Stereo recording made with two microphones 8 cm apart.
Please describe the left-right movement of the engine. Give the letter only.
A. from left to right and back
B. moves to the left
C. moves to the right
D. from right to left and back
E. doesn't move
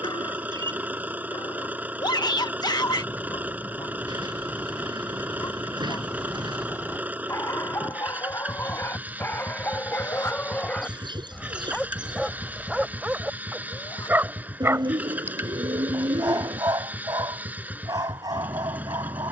E.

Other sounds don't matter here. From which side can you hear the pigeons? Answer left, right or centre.
right.